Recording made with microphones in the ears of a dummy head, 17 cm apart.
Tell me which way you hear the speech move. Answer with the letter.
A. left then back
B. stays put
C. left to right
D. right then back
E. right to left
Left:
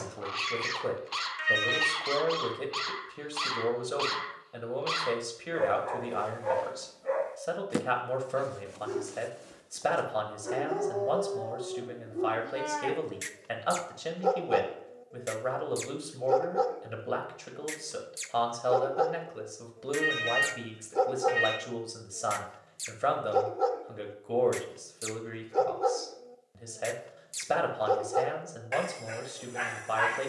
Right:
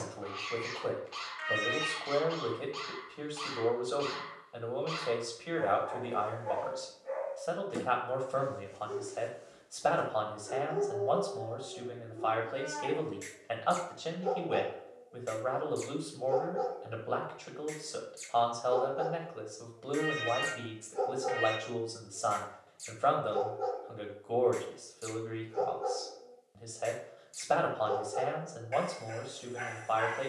B.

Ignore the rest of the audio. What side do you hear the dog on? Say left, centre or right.
left.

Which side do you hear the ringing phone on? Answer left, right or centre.
left.